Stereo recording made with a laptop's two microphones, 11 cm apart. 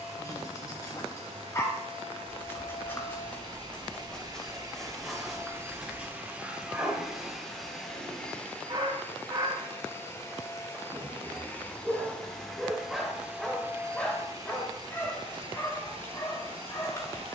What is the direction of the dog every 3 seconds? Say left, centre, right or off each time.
left, centre, right, right, centre, left.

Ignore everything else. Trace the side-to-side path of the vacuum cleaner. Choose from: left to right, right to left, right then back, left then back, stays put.
left then back.